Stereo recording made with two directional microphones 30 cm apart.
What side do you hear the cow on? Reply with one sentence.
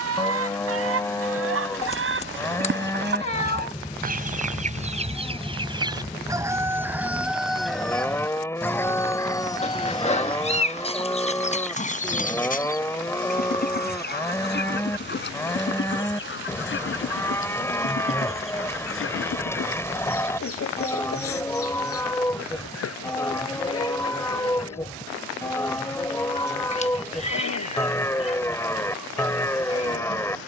You can hear the cow in the centre.